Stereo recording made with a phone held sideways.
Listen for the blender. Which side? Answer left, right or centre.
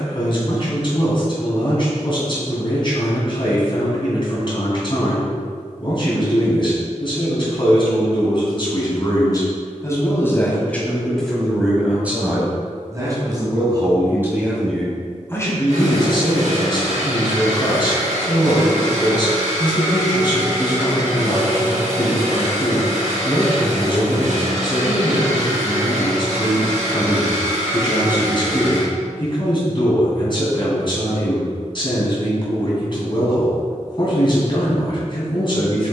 right.